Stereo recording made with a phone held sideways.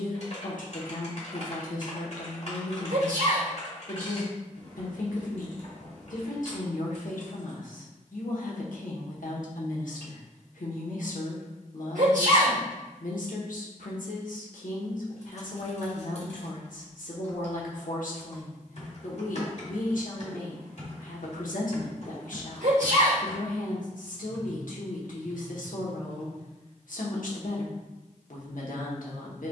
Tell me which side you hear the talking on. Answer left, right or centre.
left.